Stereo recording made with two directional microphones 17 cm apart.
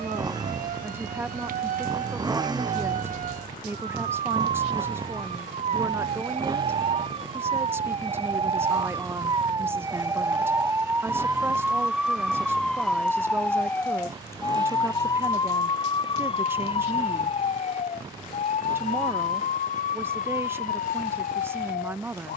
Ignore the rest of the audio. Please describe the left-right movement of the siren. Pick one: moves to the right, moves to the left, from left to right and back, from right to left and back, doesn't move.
moves to the left.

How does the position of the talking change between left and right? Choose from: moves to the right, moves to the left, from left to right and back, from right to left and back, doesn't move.
doesn't move.